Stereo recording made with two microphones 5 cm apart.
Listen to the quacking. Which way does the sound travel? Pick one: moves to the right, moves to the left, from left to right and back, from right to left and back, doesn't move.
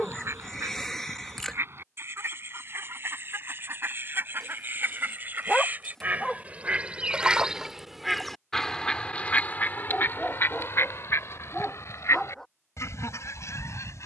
moves to the left.